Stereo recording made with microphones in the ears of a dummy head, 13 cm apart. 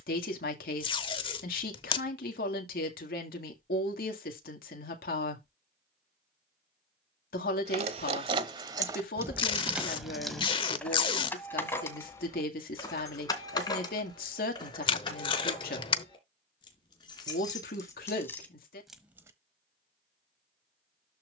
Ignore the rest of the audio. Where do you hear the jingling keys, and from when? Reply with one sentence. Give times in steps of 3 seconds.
In this clip you hear the jingling keys not at all from 0 s, on the right from 6 s, in the centre from 9 s, on the left from 12 s and in the centre from 18 s.